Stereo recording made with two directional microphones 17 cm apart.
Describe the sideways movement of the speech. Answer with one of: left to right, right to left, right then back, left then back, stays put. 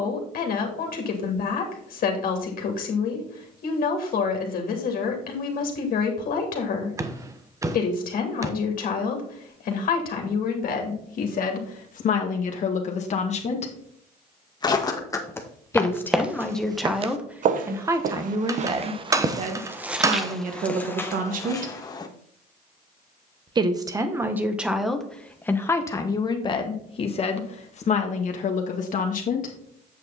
right then back.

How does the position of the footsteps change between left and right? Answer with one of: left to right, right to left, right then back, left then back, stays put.
right then back.